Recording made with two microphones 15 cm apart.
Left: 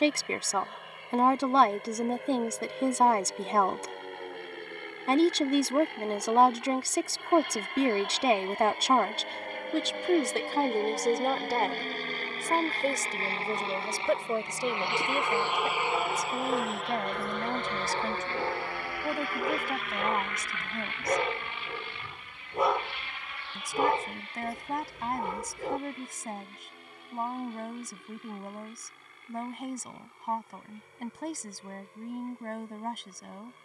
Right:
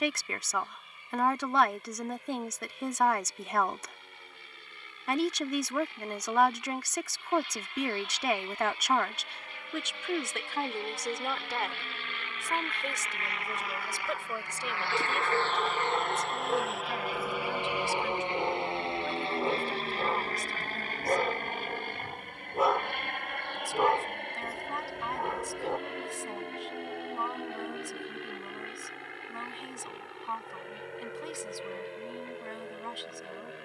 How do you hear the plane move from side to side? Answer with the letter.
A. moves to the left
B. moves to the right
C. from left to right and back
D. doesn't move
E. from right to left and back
B.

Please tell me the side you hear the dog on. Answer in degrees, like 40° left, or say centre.
centre.